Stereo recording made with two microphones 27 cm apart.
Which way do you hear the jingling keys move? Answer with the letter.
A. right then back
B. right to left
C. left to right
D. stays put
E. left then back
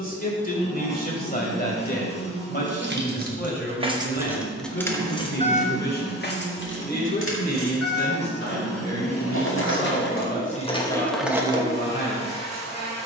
E.